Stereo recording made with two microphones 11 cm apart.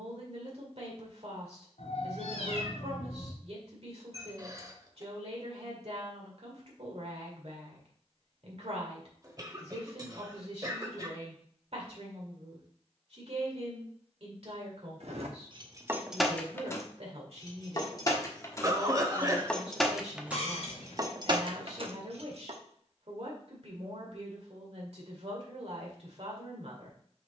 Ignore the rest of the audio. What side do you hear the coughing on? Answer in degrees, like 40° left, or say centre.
30° right.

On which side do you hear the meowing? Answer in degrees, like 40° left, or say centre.
70° left.